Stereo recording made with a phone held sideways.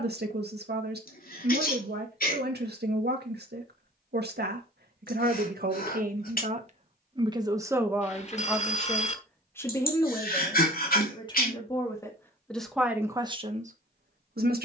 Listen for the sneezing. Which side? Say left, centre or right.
left.